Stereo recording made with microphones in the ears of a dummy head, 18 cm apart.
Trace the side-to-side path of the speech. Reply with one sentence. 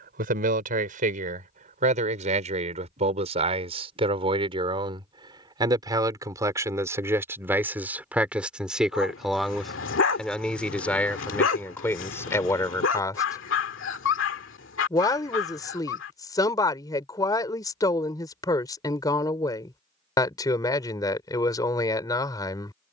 You can hear the speech go from the right side to the left.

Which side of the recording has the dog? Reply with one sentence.
You can hear the dog on the left.